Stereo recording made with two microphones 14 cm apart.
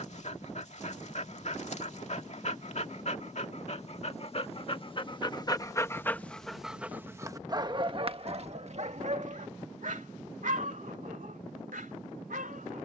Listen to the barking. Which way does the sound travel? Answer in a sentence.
In this clip you hear the barking travel towards the right.